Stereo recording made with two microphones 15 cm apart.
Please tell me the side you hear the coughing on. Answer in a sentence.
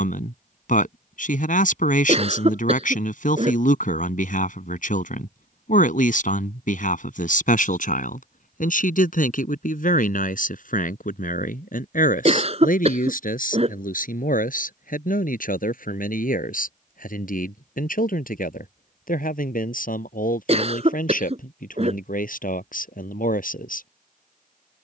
In this clip you hear the coughing on the right.